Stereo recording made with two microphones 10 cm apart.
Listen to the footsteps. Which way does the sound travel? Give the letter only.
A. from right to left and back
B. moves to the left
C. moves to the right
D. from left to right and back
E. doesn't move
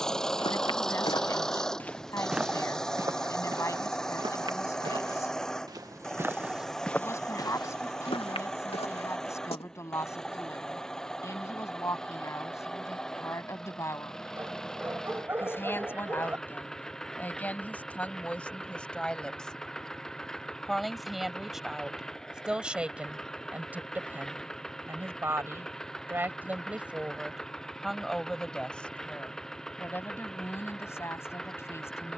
D.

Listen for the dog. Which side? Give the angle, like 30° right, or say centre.
20° right.